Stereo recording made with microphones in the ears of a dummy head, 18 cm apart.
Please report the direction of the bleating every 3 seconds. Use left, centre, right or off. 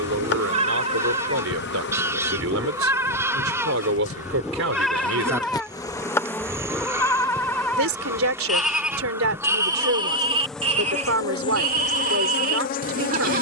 right, centre, centre, right, right.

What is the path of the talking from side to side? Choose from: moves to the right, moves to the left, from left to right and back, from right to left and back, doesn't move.
doesn't move.